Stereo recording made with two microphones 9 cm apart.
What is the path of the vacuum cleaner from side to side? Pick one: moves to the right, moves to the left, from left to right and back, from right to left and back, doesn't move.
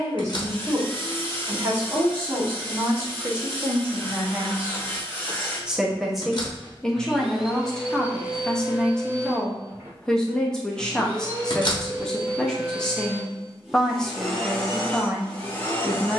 from left to right and back.